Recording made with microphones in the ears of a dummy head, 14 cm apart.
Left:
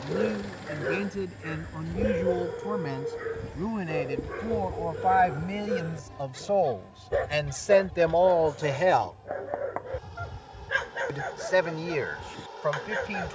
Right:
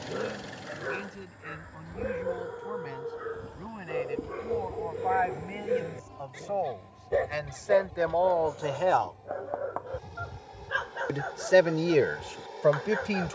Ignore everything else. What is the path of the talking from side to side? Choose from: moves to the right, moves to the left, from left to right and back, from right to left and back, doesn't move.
moves to the right.